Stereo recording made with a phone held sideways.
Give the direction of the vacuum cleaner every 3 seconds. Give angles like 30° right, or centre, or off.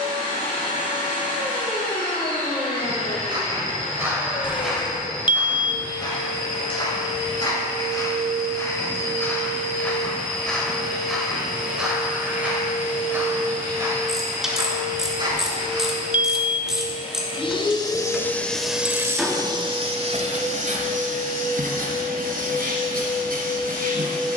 80° left, 80° left, 80° left, 80° left, 70° left, 50° left, 20° right, 70° right.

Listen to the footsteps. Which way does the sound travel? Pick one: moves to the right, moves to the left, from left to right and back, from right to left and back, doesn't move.
from right to left and back.